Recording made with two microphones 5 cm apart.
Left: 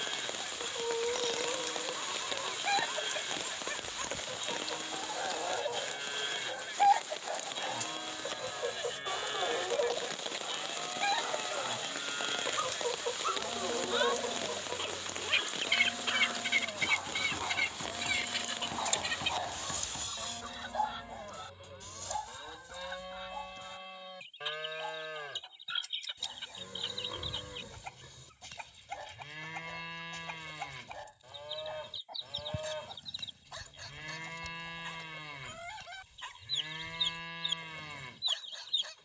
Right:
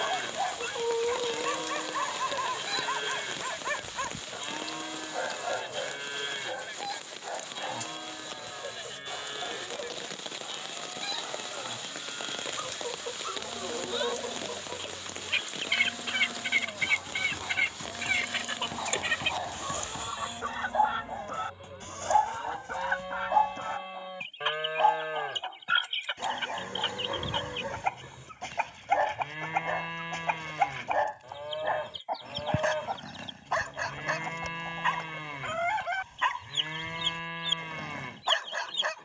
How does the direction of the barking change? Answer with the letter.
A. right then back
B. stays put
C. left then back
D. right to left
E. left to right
C.